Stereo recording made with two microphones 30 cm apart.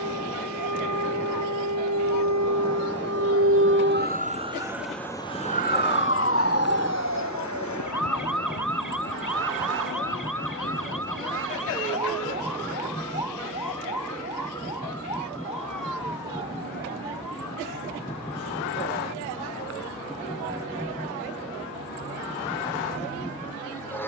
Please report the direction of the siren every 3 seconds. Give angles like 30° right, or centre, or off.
70° right, 10° right, 60° left, 70° left, 80° left, 80° left, 80° left, 80° left.